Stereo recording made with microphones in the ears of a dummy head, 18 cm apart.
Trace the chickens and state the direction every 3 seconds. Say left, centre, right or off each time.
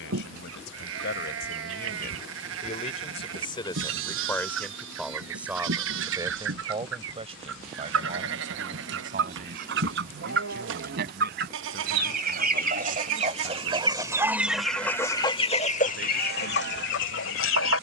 right, right, right, right, right, left.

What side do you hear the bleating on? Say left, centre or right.
right.